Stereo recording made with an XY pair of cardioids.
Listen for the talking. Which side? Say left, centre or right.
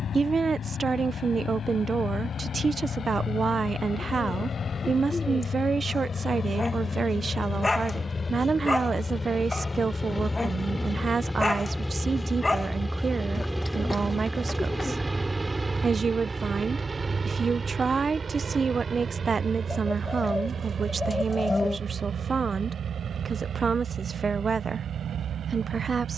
right.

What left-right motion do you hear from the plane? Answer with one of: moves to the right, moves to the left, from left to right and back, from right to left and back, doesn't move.
moves to the right.